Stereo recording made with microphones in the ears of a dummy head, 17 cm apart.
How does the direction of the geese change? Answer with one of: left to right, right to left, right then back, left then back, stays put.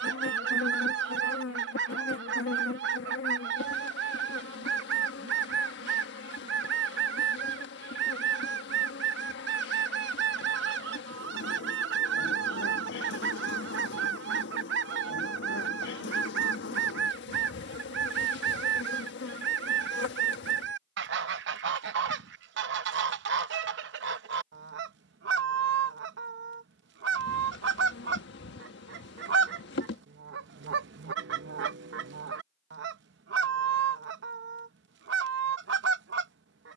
stays put.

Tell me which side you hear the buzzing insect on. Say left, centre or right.
left.